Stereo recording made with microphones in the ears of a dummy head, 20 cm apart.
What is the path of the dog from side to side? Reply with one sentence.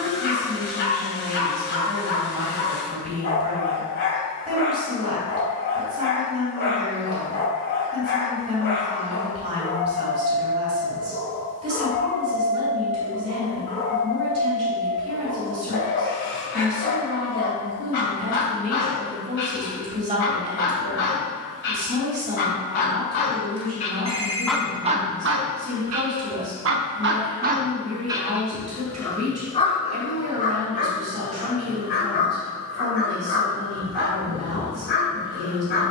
In this clip you hear the dog move from left to right and back again.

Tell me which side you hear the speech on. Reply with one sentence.
In this clip you hear the speech on the right.